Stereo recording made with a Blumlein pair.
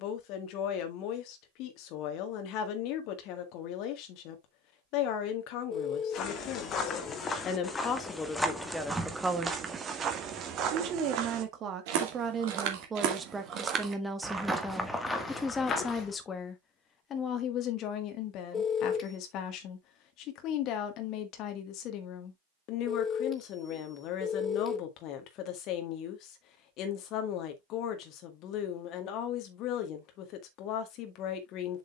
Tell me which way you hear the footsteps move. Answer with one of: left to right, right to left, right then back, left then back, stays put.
right then back.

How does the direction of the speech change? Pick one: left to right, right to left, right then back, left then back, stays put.
right then back.